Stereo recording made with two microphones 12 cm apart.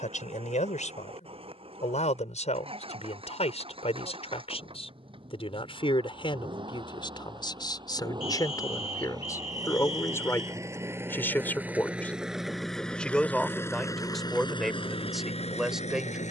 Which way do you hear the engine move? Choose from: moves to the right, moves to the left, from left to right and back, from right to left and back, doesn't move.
moves to the left.